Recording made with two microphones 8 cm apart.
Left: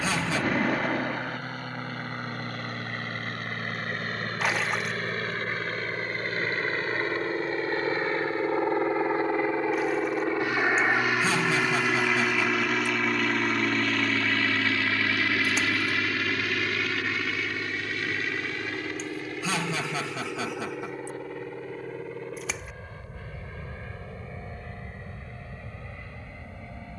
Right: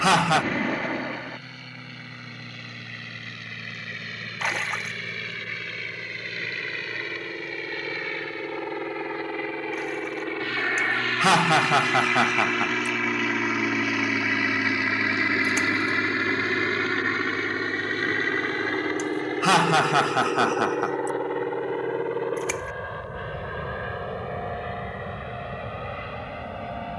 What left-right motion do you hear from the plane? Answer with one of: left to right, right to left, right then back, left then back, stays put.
left to right.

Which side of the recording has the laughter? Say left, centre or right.
right.